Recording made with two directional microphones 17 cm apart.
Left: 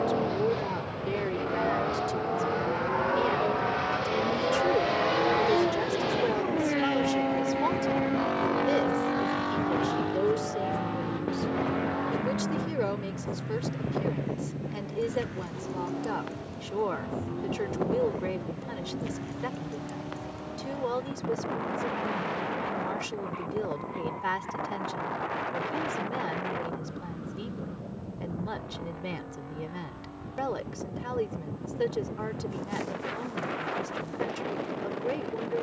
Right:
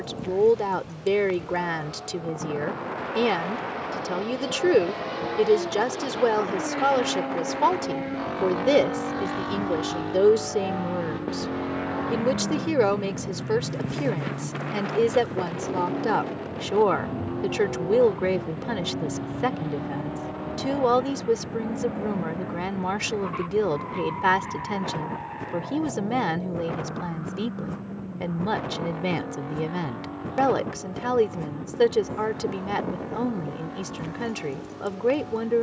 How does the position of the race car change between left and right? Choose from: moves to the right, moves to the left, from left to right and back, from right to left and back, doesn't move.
moves to the right.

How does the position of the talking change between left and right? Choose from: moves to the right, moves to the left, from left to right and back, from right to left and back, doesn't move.
doesn't move.